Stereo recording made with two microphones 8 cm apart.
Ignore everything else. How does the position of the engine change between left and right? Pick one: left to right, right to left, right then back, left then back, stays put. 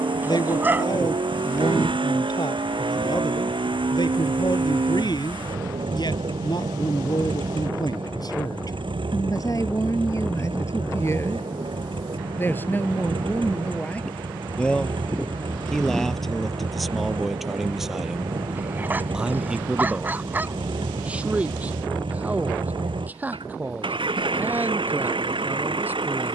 stays put.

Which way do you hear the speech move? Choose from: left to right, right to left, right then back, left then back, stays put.
left to right.